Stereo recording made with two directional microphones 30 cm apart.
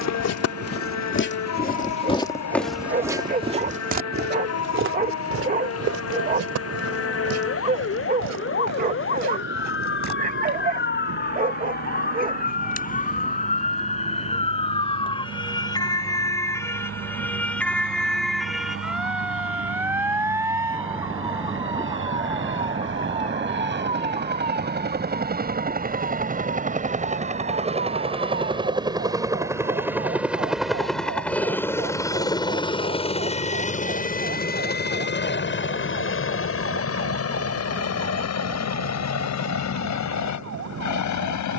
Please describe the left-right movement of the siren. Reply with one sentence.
In this clip you hear the siren move to the right.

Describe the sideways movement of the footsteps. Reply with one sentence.
In this clip you hear the footsteps go from the left side to the right.